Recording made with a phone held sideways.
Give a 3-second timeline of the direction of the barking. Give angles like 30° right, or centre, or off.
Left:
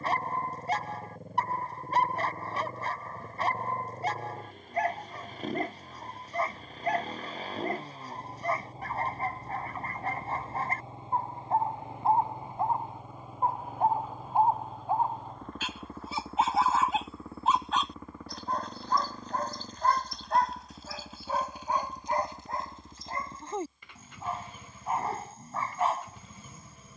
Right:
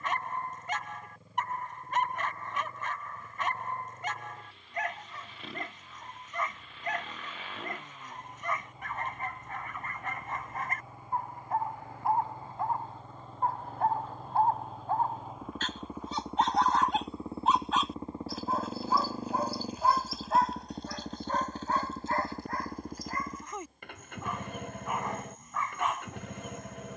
30° left, 30° left, 30° left, 30° left, 20° left, centre, 10° right, 20° left, 30° left.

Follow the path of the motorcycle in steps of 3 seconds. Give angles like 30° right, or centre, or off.
50° left, 50° left, 40° left, 30° left, 10° left, 10° right, 40° right, 50° right, 60° right.